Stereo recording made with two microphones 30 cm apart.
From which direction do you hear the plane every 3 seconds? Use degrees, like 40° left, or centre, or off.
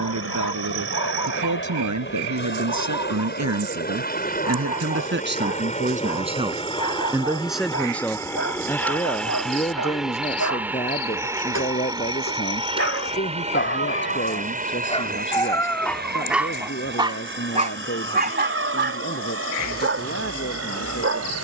40° left, 30° left, 10° left, centre, 20° right, 30° right, 40° right.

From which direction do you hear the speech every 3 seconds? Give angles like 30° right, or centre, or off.
80° right, 50° right, centre, 20° left, 40° left, 40° left, 40° left.